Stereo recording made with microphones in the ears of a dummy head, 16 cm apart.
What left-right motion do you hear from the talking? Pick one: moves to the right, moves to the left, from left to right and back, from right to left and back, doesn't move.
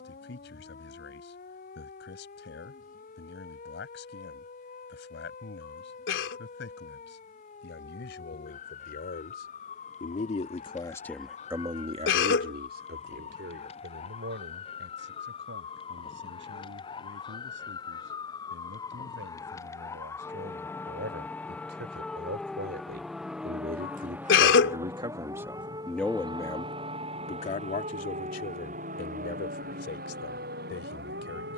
from left to right and back.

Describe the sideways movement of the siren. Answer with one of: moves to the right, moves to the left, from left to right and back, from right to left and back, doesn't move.
moves to the right.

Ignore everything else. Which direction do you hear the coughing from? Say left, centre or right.
left.